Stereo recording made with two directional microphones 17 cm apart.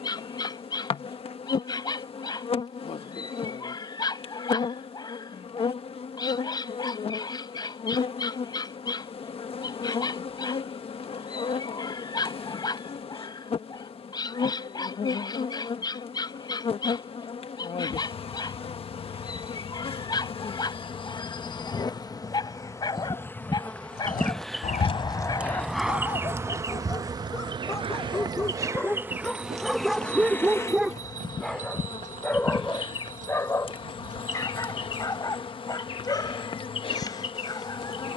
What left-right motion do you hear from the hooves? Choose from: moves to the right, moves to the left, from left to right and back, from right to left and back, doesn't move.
moves to the right.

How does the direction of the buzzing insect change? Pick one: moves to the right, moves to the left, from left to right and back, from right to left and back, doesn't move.
from left to right and back.